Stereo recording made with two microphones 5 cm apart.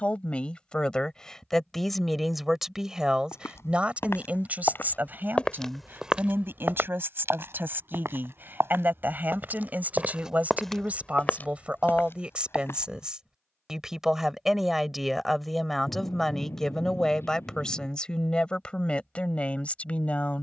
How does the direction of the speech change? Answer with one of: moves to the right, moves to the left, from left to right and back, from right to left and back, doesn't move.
from left to right and back.